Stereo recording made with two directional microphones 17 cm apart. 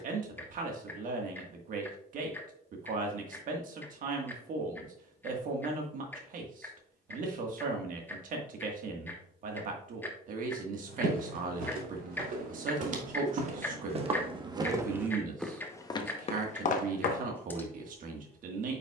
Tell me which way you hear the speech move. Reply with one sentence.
In this clip you hear the speech stay put.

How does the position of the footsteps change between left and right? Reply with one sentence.
You can hear the footsteps move to the left.